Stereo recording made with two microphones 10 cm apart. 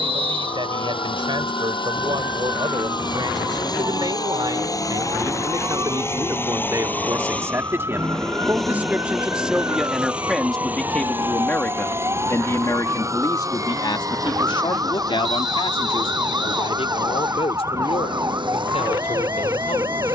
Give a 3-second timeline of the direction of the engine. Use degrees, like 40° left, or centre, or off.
50° left, 40° left, 10° left, 10° right, 30° right, 40° right, 50° right.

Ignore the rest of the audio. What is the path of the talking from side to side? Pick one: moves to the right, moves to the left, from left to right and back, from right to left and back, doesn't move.
moves to the left.